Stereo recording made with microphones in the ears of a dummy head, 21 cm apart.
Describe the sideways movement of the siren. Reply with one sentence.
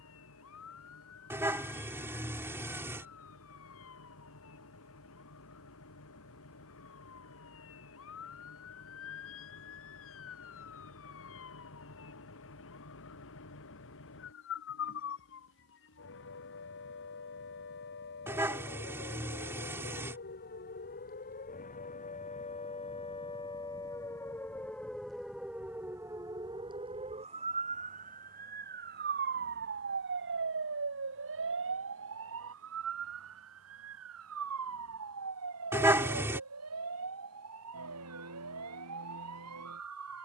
In this clip you hear the siren move to the right.